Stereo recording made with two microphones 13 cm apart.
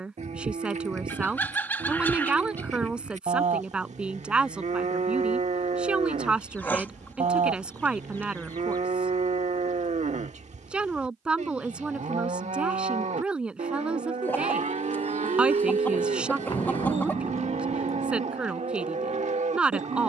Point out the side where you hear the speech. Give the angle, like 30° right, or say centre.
10° right.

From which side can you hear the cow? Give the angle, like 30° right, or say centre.
60° right.